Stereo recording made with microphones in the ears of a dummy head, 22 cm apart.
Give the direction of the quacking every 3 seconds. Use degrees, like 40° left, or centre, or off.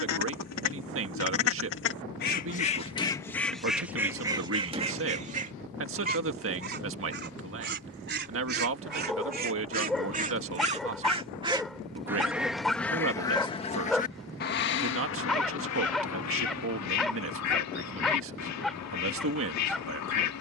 50° left, 10° right, 40° right, 30° right, 20° left, 70° left, 70° left.